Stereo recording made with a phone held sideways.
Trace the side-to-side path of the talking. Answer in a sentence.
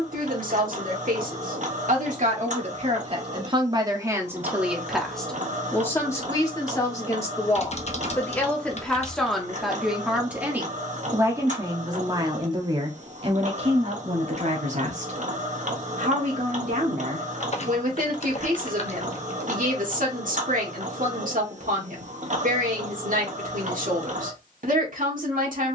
You can hear the talking move from right to left and back again.